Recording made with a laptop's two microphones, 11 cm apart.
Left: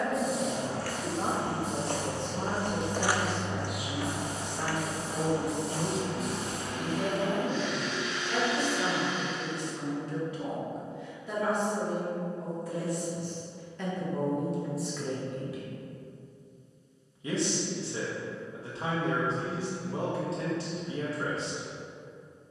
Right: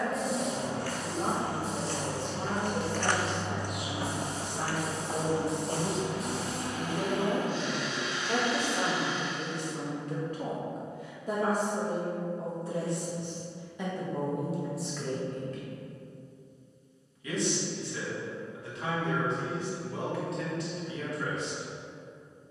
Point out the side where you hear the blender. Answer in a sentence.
You can hear the blender on the right.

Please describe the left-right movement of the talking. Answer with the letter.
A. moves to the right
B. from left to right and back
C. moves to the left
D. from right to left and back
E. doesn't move
B.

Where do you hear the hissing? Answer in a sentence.
In this clip you hear the hissing in the centre.